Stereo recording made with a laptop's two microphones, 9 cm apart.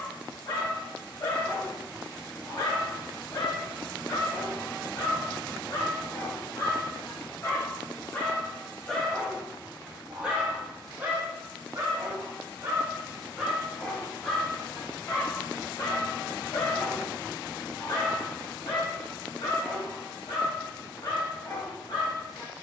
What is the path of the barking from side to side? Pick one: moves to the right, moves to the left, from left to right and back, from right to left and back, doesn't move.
from left to right and back.